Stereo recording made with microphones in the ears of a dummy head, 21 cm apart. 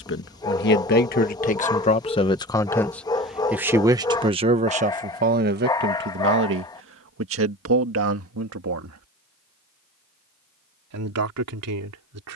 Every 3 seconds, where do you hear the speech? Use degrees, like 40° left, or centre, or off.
30° left, 30° right, 60° right, 70° right.